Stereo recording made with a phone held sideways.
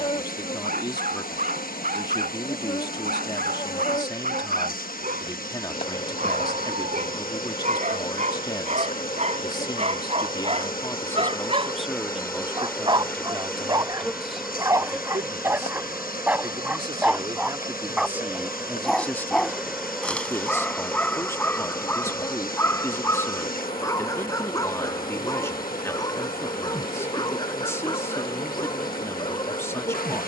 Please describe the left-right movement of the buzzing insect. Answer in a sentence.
In this clip you hear the buzzing insect go right and come back.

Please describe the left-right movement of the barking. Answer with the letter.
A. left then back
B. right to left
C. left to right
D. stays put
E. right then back
B.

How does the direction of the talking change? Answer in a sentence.
You can hear the talking move from left to right and back again.